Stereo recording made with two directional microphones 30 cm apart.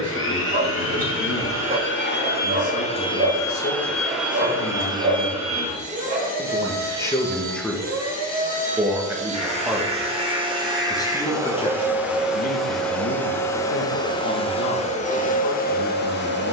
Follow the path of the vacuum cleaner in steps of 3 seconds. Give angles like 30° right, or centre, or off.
40° left, 10° right, 30° right, 20° right, 10° left, 30° left.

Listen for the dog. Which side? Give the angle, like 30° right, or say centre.
30° right.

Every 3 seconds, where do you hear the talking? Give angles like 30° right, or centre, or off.
50° left, 40° left, 10° left, 10° left, 40° left, 50° left.